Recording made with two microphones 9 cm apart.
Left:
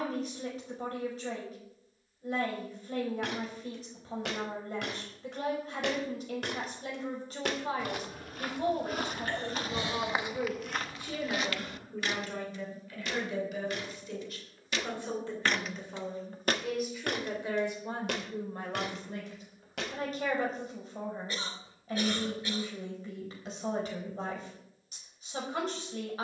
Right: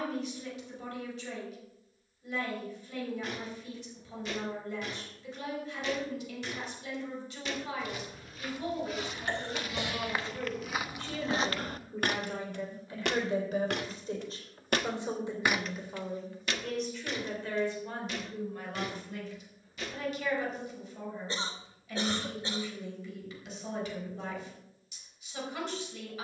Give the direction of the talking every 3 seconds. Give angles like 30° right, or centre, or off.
40° left, 40° left, 40° left, 20° left, 30° right, centre, 30° left, 40° left, 40° left.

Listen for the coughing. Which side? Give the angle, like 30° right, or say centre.
30° right.